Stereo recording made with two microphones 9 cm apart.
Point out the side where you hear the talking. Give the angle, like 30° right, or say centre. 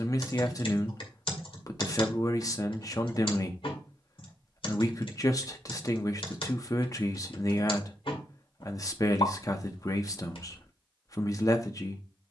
40° left.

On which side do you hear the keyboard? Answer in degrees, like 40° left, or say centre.
70° left.